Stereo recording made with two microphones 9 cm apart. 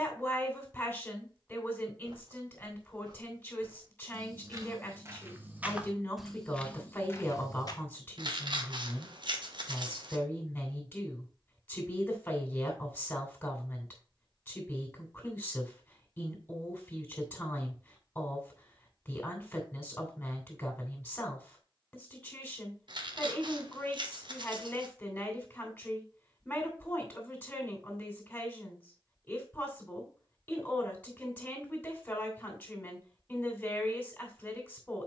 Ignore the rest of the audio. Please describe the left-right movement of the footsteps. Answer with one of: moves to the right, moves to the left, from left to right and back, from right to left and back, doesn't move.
moves to the left.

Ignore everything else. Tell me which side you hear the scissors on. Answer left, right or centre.
right.